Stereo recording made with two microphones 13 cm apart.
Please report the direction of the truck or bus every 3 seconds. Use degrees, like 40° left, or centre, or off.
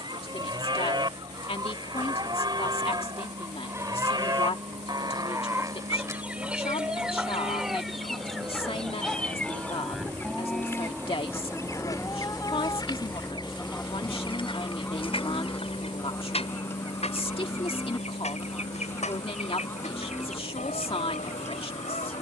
60° right, 50° right, 40° right, 20° right, 10° left, 40° left, 60° left, 70° left.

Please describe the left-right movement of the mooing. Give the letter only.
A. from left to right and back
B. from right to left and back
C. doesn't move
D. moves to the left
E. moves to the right
D.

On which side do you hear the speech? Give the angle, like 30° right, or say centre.
50° left.